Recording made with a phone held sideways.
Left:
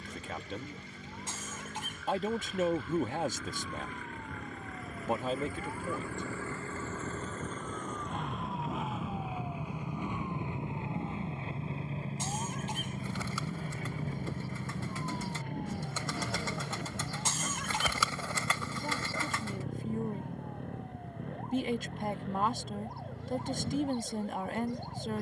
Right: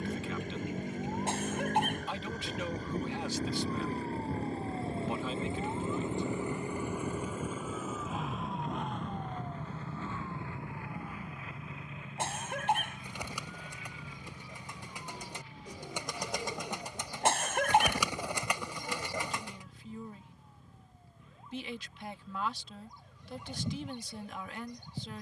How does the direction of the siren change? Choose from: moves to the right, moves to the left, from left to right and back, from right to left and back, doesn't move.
moves to the left.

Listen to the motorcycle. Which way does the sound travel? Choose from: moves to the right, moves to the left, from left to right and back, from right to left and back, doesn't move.
moves to the left.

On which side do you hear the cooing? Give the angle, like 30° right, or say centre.
20° right.